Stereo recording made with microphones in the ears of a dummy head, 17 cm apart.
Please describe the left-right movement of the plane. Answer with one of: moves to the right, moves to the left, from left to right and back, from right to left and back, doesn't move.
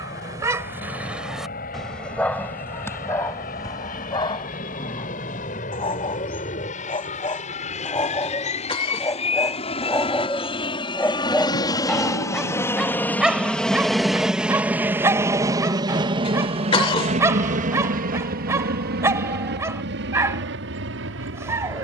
moves to the right.